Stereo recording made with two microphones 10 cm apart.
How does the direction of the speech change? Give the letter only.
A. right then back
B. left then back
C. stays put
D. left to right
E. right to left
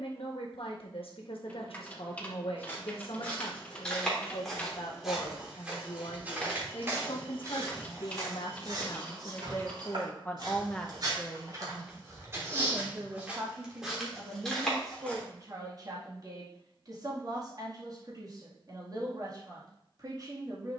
D.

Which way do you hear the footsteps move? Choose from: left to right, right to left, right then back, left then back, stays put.
right then back.